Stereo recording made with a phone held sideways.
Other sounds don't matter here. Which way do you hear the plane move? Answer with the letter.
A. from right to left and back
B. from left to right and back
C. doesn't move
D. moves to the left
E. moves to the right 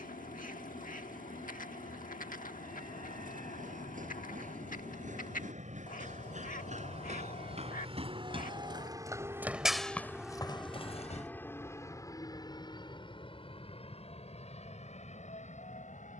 D.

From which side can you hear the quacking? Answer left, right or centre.
left.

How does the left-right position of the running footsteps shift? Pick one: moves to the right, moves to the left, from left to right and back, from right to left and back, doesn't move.
moves to the left.